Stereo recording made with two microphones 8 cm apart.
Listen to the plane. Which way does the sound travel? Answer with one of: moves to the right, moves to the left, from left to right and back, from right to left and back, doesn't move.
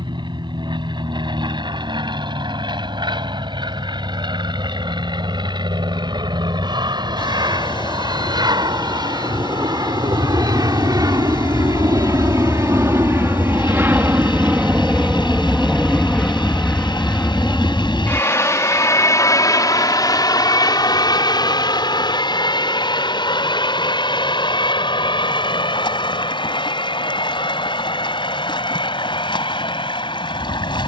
moves to the left.